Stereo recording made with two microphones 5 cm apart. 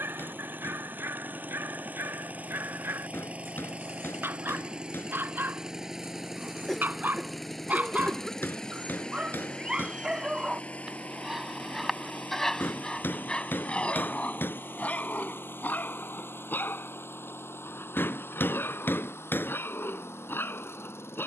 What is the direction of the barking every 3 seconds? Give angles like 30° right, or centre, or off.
60° right, 50° right, 40° right, 10° right, 20° left, 40° left, 50° left.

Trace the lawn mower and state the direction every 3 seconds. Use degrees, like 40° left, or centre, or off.
40° right, 20° right, centre, 30° left, 40° left, 60° left, 60° left.